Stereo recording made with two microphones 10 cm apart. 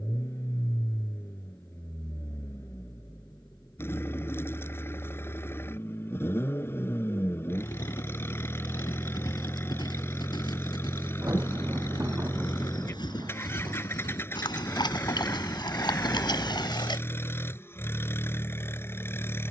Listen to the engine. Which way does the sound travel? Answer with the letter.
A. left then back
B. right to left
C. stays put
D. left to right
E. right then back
C.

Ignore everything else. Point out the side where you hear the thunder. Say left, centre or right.
right.